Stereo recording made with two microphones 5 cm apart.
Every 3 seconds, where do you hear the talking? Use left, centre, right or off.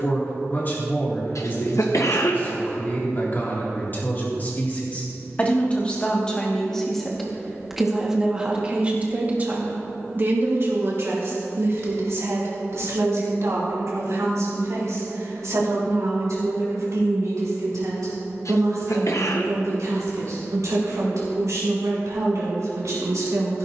left, left, centre, right, right, right, right, right.